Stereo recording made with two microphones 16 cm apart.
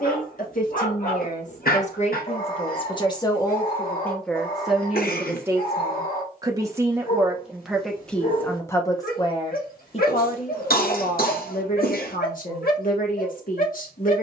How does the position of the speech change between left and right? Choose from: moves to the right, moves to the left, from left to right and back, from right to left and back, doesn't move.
from left to right and back.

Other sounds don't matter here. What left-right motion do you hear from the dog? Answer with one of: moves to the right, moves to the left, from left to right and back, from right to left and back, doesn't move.
doesn't move.